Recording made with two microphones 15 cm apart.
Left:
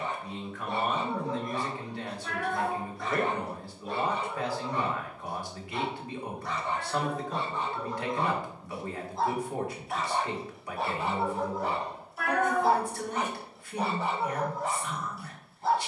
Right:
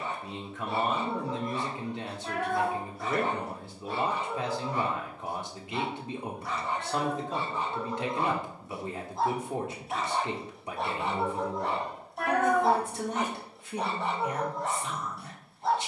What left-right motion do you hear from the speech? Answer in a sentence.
In this clip you hear the speech stay in one place.